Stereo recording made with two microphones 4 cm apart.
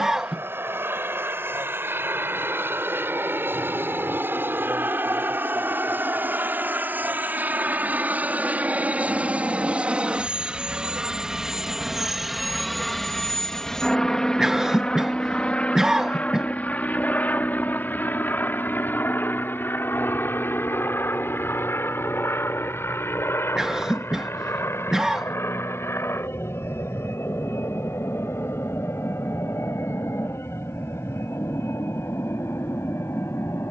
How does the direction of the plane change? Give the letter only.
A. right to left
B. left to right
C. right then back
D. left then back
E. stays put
A.